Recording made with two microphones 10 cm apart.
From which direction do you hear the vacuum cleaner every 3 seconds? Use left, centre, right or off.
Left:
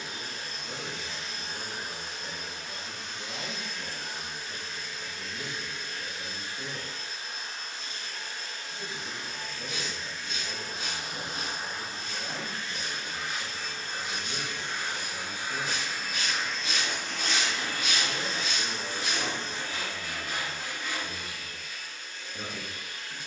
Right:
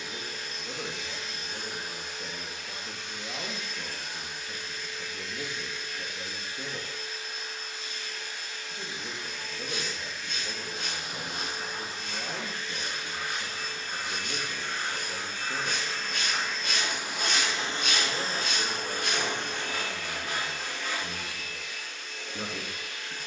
left, left, left, left, left, centre, right, right.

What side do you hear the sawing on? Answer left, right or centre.
right.